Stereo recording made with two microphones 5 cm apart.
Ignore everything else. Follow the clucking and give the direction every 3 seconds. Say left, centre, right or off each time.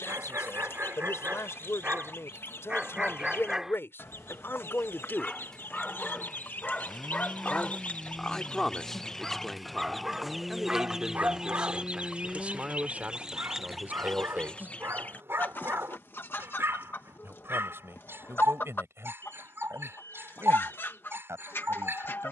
left, left, left, centre, centre, left, left, left.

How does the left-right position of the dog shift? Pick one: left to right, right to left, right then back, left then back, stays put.
left then back.